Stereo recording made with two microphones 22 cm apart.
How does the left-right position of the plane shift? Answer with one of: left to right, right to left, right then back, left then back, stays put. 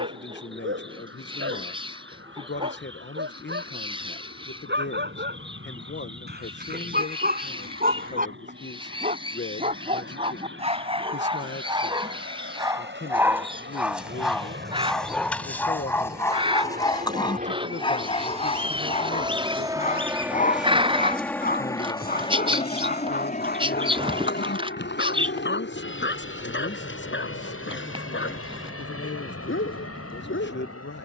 right to left.